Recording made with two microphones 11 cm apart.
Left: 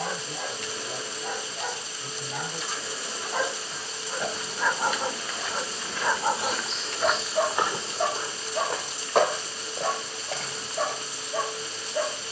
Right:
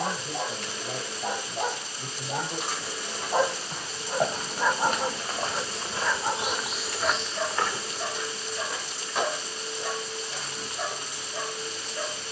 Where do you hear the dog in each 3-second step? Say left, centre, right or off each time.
right, centre, left, left.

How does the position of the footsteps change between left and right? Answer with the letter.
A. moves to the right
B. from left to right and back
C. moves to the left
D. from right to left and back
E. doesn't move
C.